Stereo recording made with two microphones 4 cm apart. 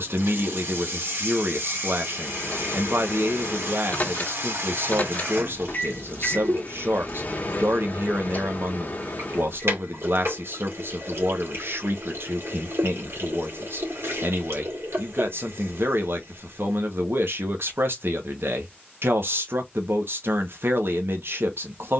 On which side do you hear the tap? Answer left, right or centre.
right.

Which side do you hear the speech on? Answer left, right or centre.
right.